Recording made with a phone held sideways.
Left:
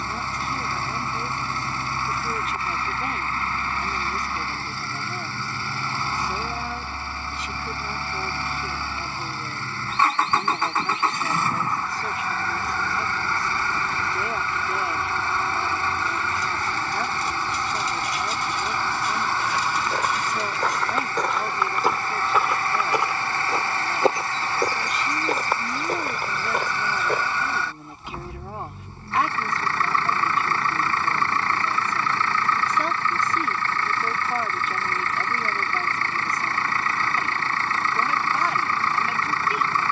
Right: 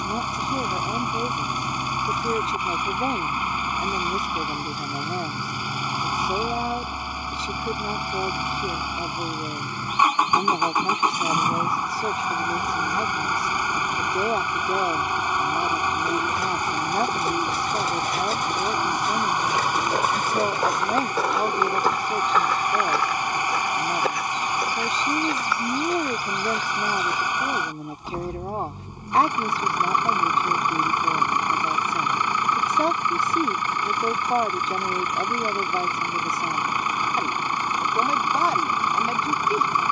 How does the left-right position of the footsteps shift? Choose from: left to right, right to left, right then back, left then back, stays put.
right to left.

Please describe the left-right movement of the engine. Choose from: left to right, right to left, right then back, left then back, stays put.
stays put.